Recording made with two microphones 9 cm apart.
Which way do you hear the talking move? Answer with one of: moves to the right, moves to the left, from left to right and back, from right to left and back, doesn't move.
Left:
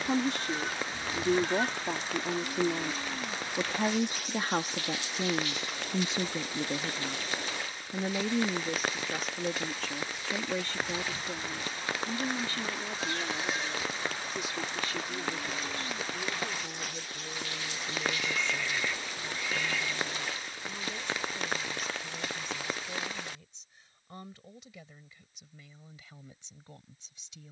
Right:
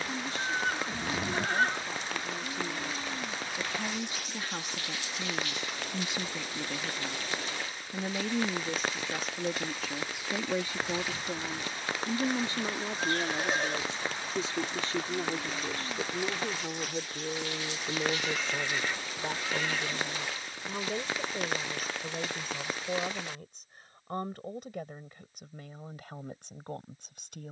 moves to the right.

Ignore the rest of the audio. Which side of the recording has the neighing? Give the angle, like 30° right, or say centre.
50° right.